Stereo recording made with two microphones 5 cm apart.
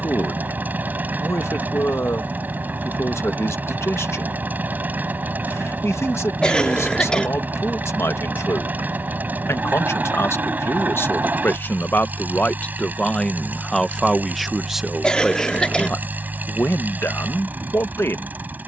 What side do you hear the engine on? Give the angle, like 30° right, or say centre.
40° right.